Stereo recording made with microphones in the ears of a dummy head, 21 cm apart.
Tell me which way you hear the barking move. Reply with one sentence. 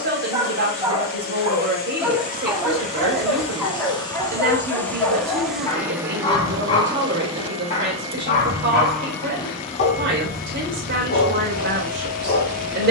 In this clip you hear the barking go from the right side to the left.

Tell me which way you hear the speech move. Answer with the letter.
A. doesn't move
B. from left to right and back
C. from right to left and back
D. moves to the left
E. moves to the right
A.